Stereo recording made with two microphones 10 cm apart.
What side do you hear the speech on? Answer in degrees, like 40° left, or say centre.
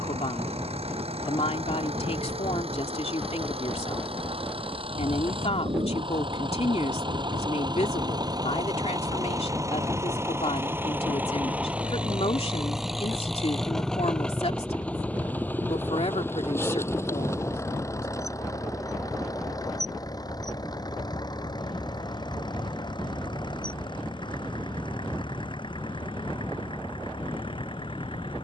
80° left.